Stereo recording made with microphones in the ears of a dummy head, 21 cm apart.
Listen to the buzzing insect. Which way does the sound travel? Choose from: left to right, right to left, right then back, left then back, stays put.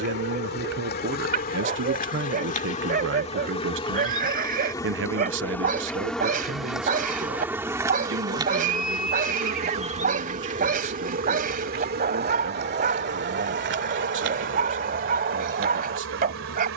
left to right.